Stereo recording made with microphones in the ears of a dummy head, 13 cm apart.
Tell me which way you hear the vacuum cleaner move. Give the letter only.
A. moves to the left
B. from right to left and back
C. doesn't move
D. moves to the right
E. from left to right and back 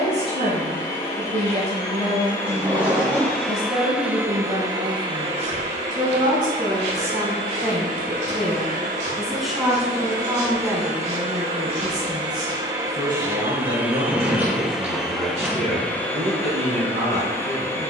E.